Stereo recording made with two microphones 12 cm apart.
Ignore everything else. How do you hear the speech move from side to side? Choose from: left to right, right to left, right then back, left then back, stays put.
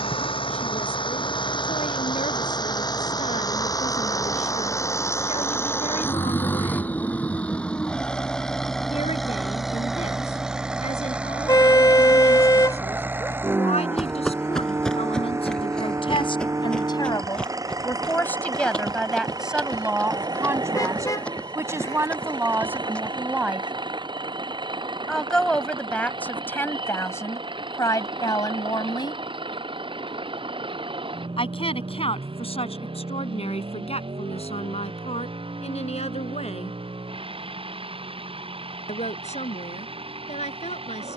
right then back.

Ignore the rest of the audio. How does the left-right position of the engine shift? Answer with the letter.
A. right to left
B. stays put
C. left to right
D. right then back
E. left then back
C.